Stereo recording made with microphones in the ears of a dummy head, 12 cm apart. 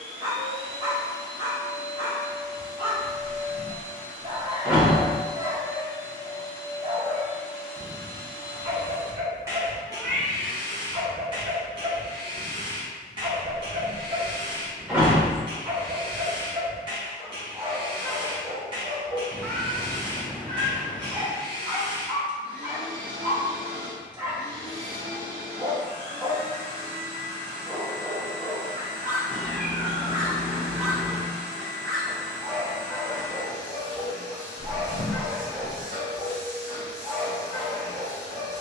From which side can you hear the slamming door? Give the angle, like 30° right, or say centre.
10° right.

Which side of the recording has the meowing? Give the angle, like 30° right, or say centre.
10° left.